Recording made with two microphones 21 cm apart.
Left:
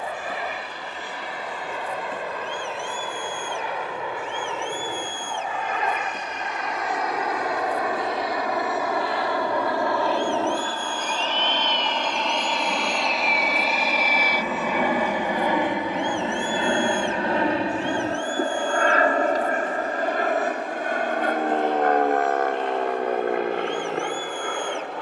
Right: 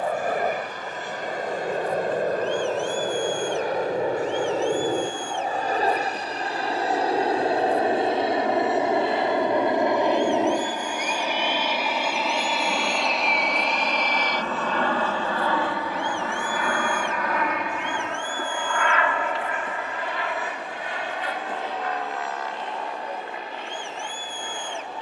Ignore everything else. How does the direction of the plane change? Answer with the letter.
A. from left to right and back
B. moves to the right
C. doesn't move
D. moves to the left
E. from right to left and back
D.